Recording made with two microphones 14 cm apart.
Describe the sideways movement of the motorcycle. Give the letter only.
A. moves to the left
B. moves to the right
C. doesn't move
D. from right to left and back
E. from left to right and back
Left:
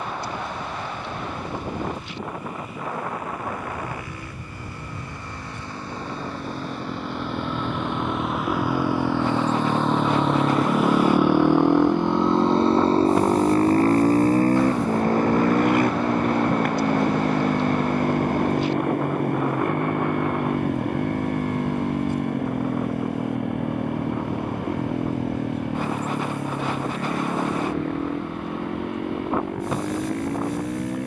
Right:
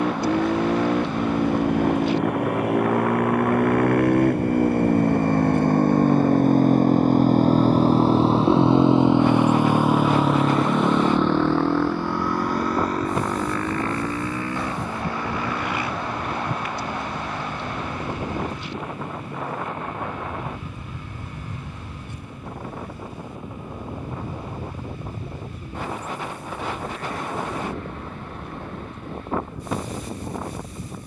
A.